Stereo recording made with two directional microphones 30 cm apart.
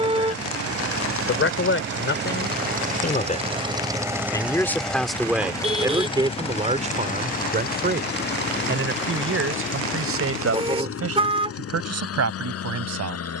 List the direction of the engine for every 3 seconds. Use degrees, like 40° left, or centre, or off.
40° right, centre, 30° left, 50° left, 50° left.